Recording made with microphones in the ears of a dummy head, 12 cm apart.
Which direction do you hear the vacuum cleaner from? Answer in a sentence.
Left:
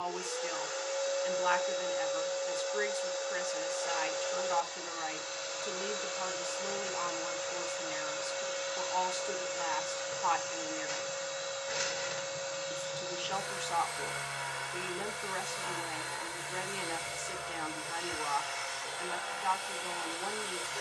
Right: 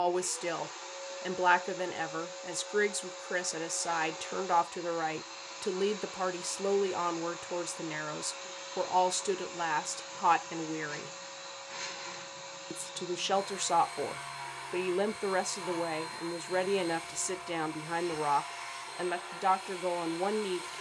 In this clip you hear the vacuum cleaner on the left.